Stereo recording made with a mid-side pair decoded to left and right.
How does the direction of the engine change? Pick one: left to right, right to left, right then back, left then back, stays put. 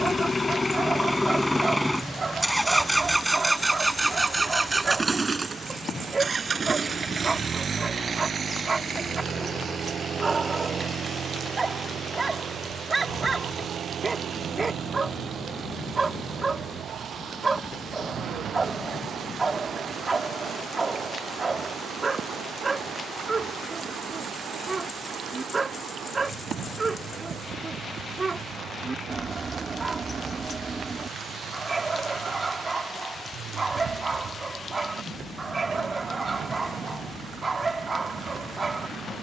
left to right.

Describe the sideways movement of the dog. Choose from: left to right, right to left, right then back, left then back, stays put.
stays put.